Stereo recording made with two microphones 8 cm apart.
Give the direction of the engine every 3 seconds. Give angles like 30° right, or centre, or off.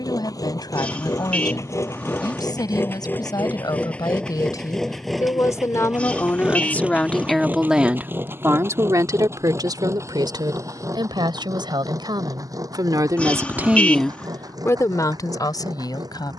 40° left, 10° left, 20° right, 40° right, 50° right, 50° right.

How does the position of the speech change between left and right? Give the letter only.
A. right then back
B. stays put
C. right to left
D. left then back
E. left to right
A.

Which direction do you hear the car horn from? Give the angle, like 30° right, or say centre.
20° left.